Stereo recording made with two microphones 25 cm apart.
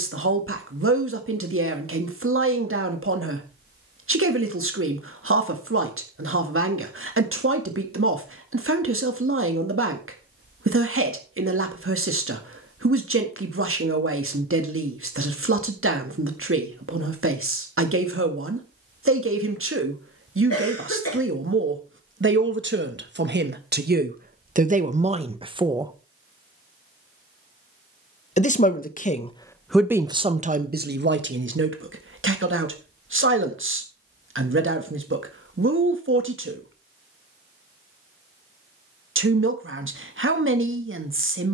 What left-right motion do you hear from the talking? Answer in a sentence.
You can hear the talking go left and come back.